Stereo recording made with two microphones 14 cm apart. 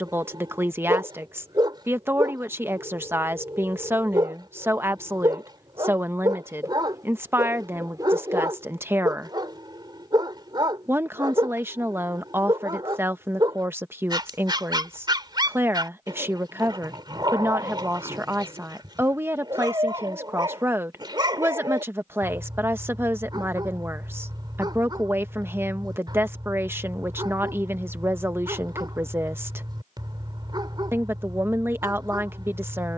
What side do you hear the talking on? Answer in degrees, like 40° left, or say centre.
20° right.